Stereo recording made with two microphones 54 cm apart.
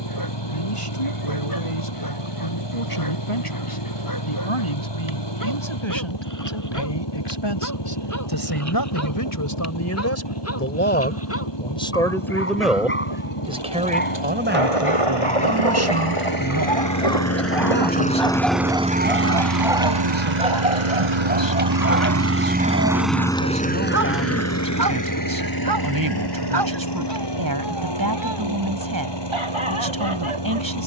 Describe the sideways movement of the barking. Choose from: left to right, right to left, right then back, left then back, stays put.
left to right.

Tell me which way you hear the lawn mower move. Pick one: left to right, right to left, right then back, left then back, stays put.
right then back.